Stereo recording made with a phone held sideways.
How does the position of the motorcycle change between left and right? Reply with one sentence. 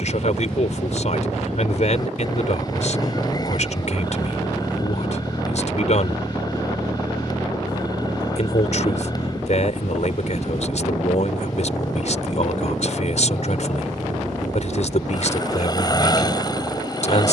You can hear the motorcycle stay put.